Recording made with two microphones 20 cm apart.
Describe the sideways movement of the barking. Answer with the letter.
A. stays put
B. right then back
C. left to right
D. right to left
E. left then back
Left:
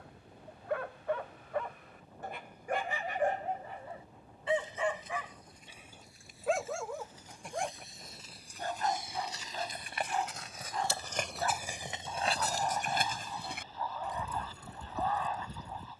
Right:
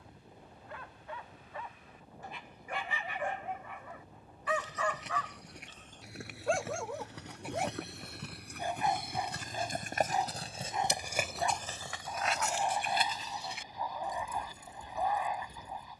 C.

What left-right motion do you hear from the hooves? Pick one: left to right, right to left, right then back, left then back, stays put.
right to left.